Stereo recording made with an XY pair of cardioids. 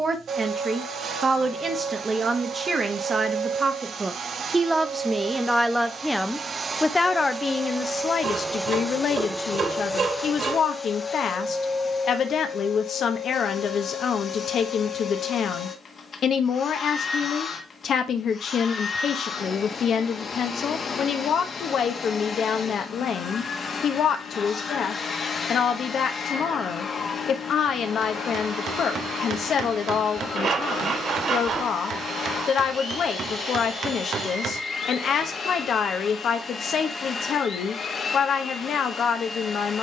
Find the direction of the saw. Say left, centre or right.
right.